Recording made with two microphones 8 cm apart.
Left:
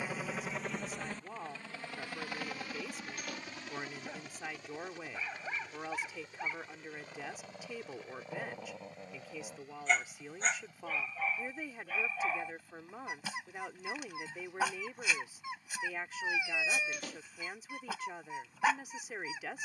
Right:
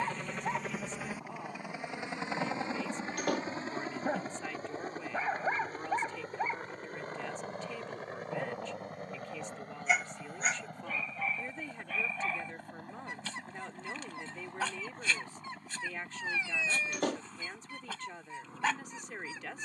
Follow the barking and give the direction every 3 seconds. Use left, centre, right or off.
right, right, right, centre, centre, centre, centre.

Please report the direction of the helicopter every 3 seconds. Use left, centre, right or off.
centre, right, right, right, right, right, right.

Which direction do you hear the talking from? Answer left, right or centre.
centre.